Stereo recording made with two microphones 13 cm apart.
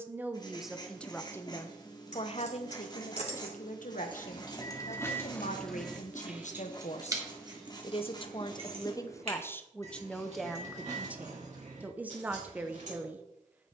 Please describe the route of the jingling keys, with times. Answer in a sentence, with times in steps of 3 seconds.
In this clip you hear the jingling keys on the left from 0 s and on the right from 6 s.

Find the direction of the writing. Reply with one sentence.
You can hear the writing on the left.